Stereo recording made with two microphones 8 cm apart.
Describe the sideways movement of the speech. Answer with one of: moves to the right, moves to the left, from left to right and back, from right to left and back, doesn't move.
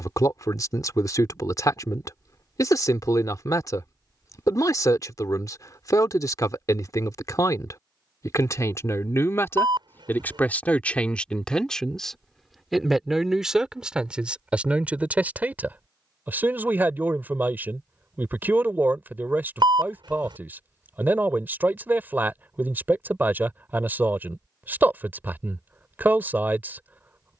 moves to the right.